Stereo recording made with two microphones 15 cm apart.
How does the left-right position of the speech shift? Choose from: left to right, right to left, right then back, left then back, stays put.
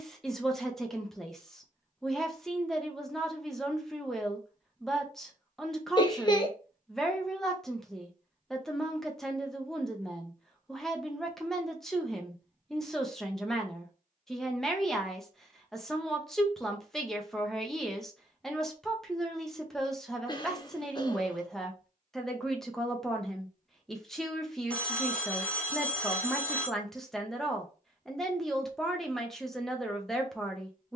stays put.